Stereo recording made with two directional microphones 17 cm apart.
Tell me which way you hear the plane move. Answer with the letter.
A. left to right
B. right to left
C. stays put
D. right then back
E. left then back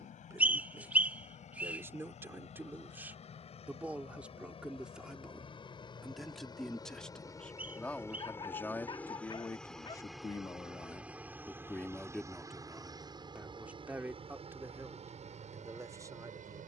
A.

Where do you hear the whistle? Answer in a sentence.
In this clip you hear the whistle in the centre.